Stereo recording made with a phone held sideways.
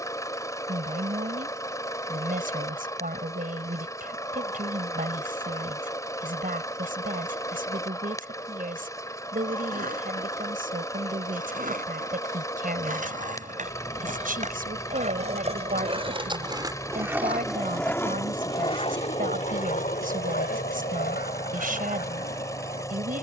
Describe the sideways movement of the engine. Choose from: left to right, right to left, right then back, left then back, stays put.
stays put.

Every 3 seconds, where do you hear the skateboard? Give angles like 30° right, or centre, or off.
off, off, off, 60° right, 60° right, 20° right, 50° left, 80° left.